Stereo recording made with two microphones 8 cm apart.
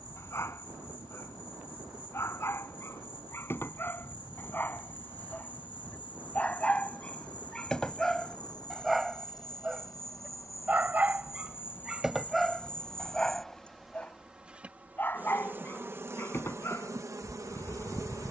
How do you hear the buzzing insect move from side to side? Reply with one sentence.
You can hear the buzzing insect move from left to right.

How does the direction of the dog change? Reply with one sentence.
You can hear the dog move from left to right and back again.